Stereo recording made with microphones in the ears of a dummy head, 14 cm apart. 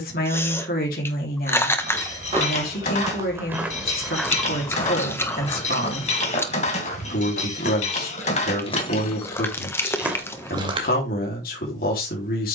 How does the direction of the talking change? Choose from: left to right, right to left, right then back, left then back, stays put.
stays put.